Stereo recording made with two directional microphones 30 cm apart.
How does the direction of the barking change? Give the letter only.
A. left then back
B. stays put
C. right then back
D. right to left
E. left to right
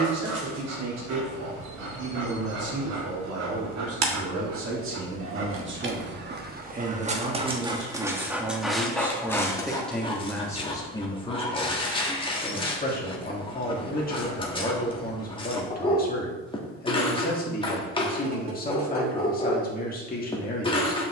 D.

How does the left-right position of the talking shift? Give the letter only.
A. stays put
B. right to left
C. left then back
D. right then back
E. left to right
B.